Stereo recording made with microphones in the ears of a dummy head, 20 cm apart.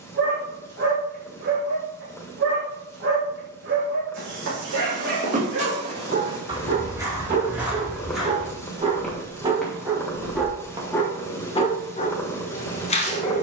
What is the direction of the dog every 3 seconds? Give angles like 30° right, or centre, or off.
60° right, 60° right, 40° right, centre, 30° left.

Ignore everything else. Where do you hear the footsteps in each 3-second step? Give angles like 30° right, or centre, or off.
off, 30° right, 10° right, centre, off.